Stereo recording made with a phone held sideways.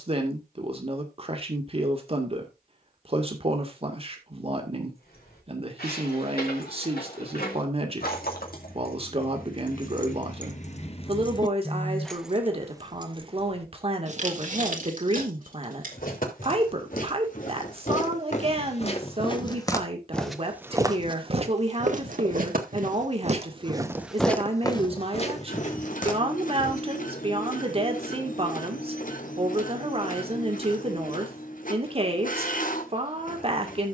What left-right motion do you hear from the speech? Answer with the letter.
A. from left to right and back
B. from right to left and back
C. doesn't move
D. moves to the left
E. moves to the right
C.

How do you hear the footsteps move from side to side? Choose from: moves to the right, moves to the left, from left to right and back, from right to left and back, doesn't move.
from left to right and back.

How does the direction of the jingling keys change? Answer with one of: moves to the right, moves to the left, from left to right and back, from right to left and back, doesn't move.
moves to the right.